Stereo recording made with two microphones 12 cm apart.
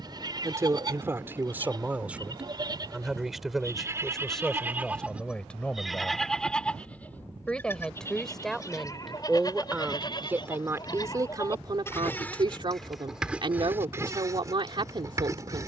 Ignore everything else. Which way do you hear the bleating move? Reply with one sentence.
You can hear the bleating go left and come back.